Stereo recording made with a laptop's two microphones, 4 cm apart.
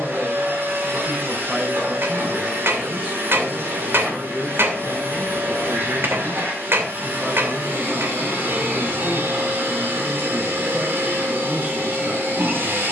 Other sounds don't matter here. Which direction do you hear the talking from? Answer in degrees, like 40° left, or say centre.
40° right.